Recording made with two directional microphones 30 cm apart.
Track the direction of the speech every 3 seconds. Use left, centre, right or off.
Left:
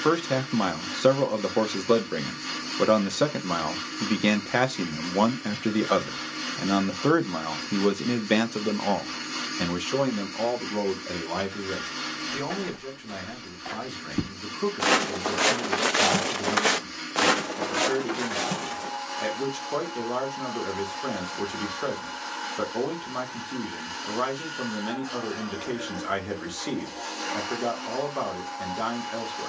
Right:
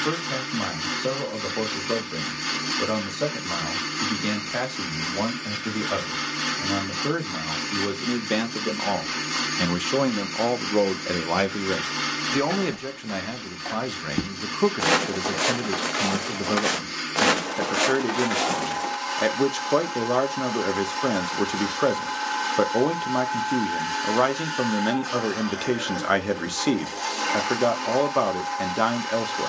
left, left, left, right, right, right, right, right, right, right.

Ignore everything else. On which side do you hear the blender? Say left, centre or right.
right.